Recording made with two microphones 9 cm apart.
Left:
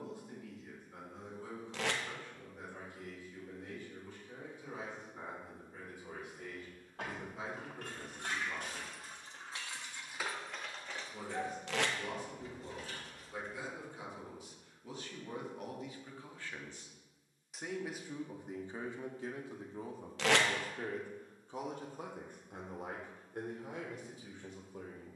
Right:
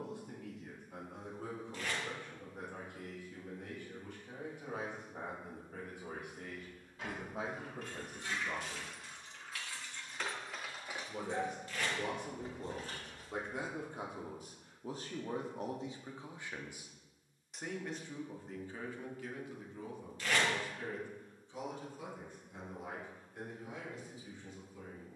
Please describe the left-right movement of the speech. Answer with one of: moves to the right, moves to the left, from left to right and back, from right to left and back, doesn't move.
moves to the left.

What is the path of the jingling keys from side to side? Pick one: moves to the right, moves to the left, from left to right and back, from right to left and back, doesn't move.
moves to the right.